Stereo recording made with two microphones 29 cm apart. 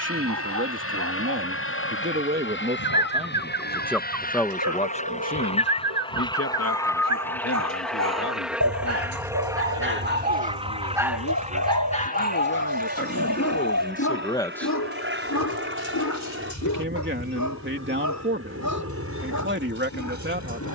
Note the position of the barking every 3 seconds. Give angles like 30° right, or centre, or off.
80° right, 70° right, 70° right, 20° right, 50° left, 70° left, 80° left.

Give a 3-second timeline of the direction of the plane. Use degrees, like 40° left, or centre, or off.
50° left, 30° left, centre, 20° right, 30° right, 40° right, 50° right.